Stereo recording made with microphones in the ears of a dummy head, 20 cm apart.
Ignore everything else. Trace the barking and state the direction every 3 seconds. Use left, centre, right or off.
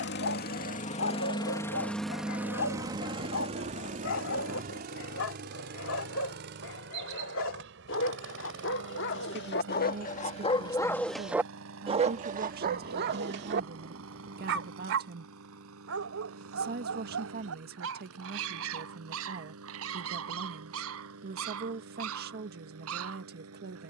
left, left, left, left, right, right, right, right.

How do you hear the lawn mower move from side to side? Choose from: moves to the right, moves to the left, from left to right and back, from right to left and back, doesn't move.
moves to the right.